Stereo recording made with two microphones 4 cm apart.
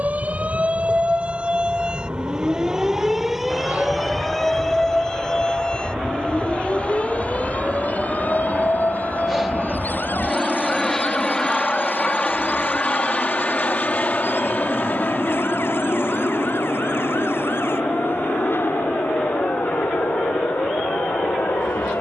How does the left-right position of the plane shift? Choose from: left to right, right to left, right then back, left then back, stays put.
right to left.